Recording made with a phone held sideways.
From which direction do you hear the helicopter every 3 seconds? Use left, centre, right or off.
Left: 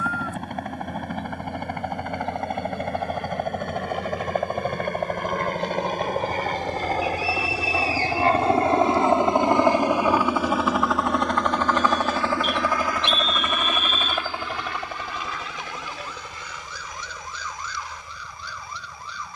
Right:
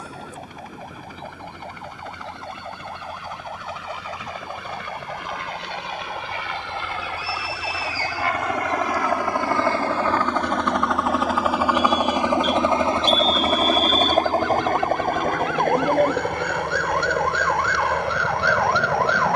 left, left, left, centre, right, right, right.